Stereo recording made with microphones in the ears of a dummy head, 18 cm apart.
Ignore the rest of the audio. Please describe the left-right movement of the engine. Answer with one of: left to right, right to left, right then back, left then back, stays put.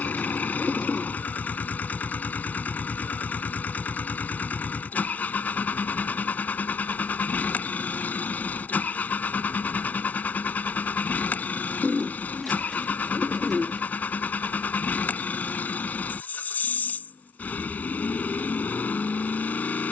stays put.